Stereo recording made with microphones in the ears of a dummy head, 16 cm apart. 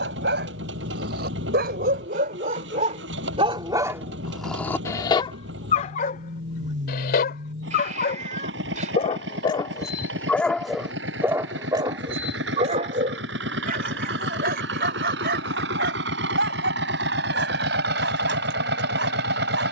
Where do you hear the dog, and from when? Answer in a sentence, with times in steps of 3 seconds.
In this clip you hear the dog on the right from 0 s, in the centre from 3 s, on the left from 6 s, in the centre from 9 s and on the right from 12 s.